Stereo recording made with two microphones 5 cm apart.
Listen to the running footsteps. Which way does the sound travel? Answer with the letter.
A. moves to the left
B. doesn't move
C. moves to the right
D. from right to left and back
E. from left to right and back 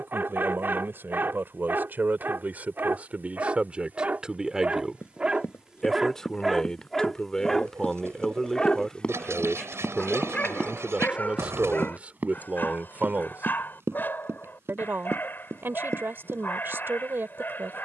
C.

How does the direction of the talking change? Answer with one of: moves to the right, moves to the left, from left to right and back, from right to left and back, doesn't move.
from right to left and back.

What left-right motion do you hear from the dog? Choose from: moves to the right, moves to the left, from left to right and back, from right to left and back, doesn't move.
moves to the left.